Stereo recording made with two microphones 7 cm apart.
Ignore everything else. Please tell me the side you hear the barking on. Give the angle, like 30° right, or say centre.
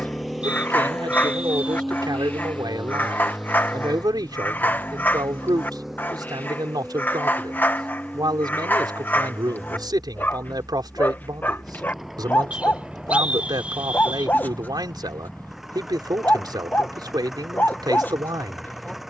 30° left.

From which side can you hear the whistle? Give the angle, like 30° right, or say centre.
20° right.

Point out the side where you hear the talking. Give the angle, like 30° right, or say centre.
70° right.